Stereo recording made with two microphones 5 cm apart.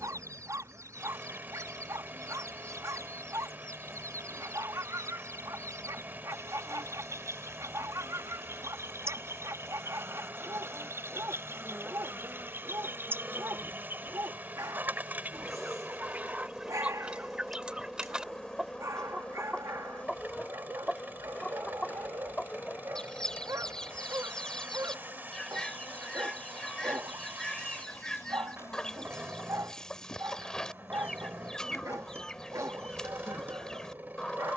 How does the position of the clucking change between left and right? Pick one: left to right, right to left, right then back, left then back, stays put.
right to left.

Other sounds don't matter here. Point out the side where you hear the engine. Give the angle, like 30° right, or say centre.
40° right.